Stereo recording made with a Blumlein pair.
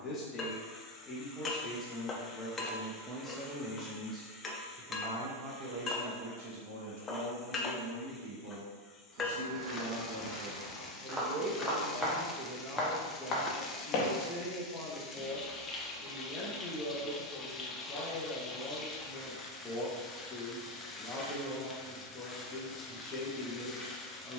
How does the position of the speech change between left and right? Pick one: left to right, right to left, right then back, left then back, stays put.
right then back.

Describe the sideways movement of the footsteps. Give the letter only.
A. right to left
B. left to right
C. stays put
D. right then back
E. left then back
A.